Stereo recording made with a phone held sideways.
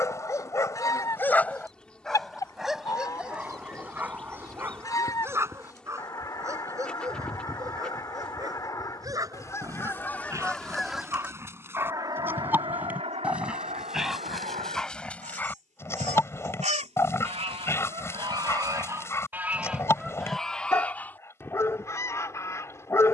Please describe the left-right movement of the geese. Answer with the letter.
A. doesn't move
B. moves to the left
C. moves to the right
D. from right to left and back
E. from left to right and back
E.